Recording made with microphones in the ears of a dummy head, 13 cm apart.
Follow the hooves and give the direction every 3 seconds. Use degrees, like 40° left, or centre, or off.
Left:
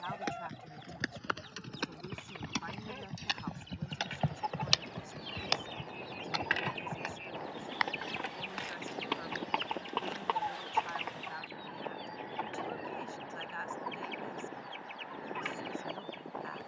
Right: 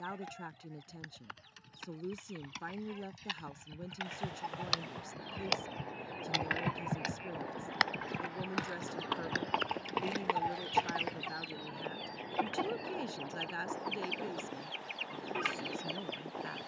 70° left, 30° left, 50° right, 70° right, off, off.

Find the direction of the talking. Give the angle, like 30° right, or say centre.
40° right.